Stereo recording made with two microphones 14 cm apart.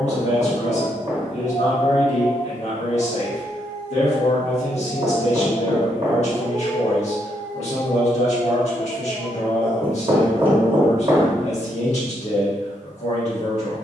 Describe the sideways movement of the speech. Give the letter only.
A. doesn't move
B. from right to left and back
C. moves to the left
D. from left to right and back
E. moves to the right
A.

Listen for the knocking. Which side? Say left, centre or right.
right.